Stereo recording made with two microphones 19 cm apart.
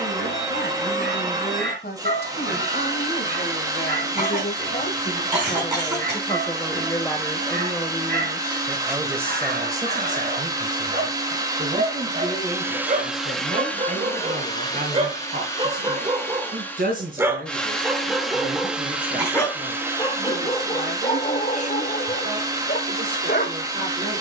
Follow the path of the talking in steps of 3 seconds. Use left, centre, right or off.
left, left, centre, right, right, right, right, right.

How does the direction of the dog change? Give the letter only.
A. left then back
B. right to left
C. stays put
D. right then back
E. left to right
B.